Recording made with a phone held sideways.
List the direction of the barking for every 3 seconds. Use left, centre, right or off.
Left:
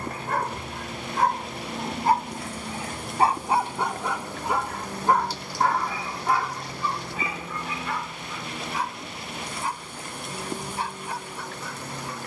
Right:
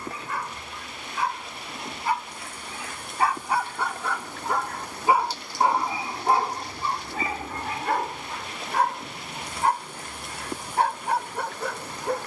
left, centre, right, right.